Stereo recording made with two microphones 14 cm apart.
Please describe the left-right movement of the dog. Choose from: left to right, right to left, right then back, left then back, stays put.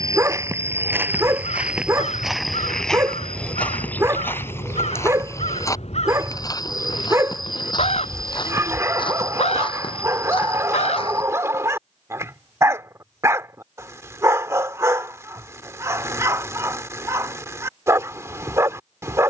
stays put.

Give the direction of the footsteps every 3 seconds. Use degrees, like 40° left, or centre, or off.
10° right, 20° left, 30° left, 40° left, off, off, off.